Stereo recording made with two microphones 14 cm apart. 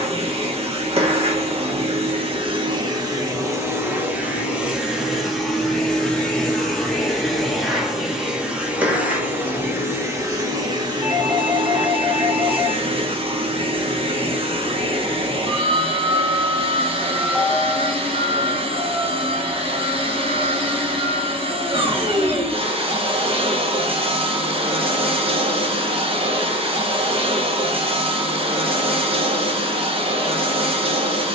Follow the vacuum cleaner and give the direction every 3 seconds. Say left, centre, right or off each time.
right, centre, centre, right, right, right, right, right, right, right, right.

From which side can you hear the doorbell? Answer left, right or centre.
centre.